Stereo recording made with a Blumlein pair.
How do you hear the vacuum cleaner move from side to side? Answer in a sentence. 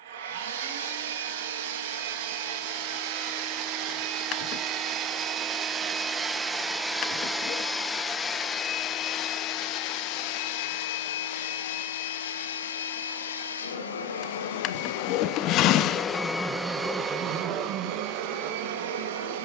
In this clip you hear the vacuum cleaner move from right to left and back again.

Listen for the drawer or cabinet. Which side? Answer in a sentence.
You can hear the drawer or cabinet on the left.